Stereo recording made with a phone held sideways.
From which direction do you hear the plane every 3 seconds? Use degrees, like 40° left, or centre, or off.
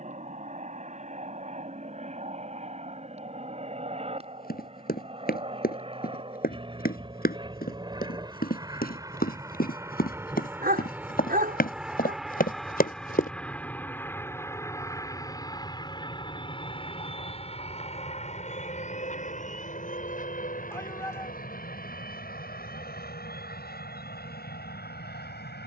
50° right, 40° right, 30° right, 10° right, 10° left, 30° left, 50° left, 60° left, 60° left.